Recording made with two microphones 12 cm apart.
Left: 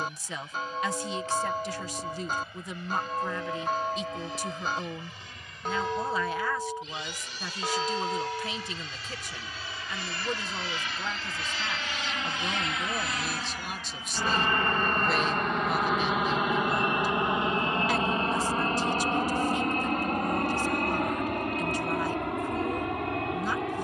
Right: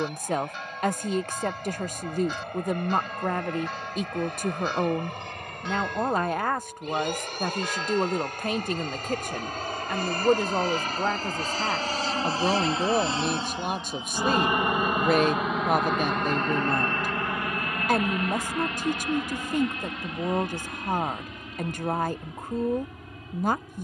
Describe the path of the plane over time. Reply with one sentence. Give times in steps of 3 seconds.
In this clip you hear the plane on the right from 0 s, in the centre from 15 s and on the left from 18 s.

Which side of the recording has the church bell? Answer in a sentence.
You can hear the church bell on the left.